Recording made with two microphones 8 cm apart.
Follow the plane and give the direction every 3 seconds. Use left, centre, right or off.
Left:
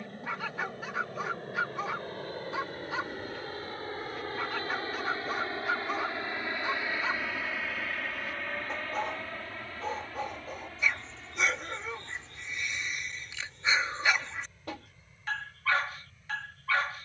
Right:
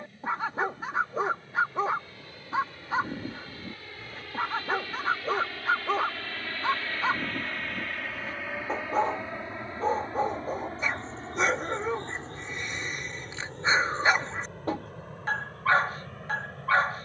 left, left, centre, right, right, right.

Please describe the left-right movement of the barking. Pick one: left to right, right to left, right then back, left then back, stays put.
stays put.